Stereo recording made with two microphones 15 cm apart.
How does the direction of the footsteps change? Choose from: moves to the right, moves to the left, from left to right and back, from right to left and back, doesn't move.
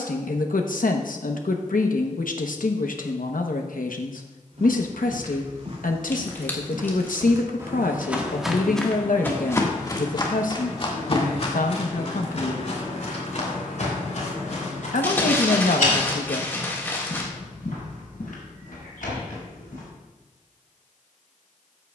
moves to the left.